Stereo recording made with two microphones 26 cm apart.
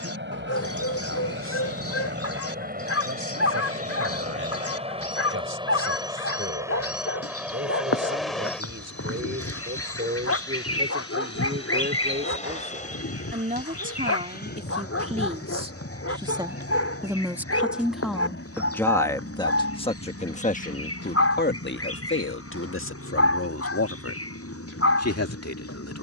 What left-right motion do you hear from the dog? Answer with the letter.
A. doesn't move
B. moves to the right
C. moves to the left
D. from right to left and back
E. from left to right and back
A.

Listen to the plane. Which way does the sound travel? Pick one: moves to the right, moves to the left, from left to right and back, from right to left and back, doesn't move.
moves to the left.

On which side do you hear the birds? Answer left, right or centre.
left.